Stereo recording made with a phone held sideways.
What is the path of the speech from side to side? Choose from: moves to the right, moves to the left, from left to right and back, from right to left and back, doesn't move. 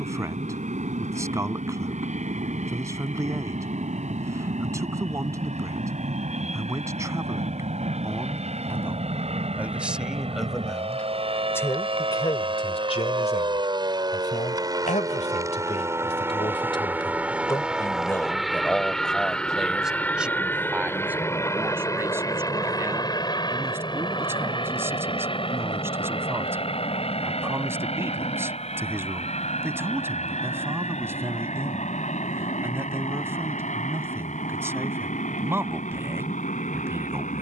from right to left and back.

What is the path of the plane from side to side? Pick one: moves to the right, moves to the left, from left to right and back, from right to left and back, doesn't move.
moves to the left.